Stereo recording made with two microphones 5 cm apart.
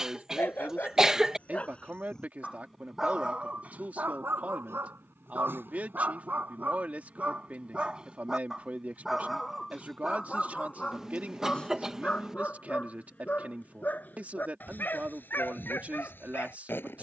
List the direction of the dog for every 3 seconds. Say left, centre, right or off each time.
left, right, right, centre, left, left.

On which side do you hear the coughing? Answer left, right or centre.
centre.